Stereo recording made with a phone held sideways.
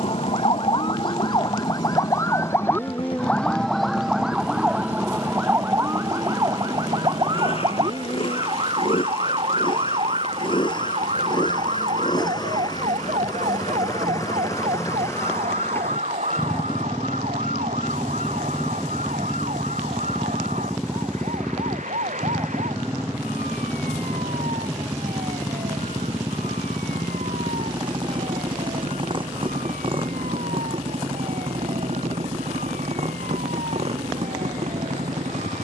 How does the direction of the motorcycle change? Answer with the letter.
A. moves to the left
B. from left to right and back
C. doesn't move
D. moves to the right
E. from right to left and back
D.